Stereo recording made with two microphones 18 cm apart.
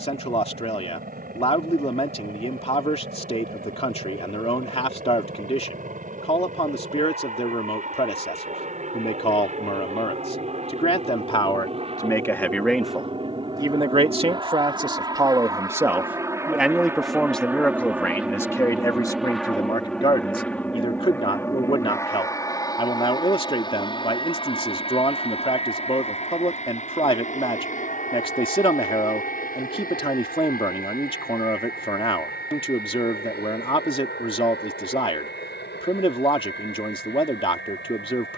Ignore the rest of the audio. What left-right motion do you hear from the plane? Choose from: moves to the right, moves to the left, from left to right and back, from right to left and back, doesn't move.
moves to the left.